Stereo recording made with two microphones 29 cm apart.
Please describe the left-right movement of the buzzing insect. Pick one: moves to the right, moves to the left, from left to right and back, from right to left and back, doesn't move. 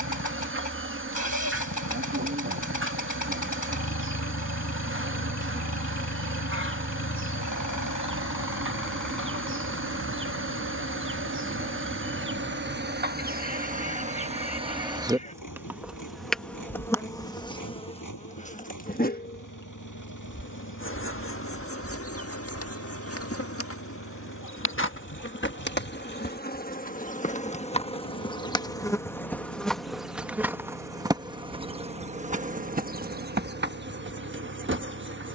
from right to left and back.